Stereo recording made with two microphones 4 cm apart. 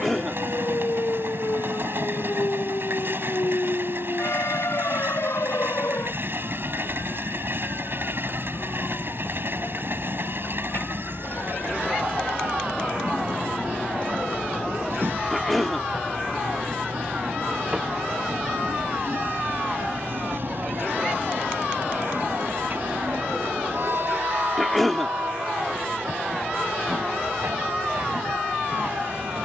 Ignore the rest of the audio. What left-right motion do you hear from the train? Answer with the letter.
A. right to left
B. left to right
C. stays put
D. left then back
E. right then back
C.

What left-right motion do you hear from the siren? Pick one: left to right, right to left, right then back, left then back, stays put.
left to right.